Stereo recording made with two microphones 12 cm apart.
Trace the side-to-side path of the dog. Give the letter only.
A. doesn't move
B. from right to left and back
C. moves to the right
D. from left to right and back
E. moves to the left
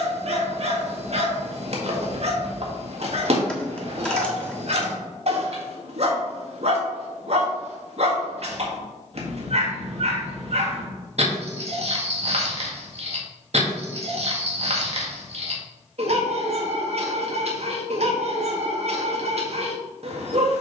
A.